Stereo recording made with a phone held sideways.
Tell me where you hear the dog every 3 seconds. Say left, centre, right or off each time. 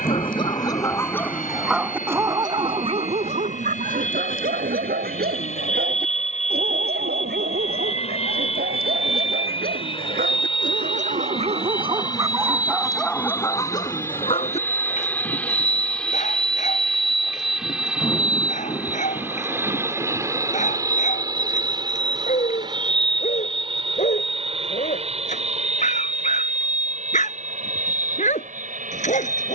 centre, right, right, right, centre, left, left, left, left, left.